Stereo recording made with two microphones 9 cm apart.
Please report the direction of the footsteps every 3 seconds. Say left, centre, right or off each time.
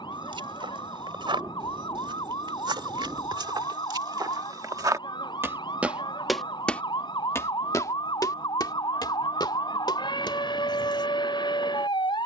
right, right, left, left.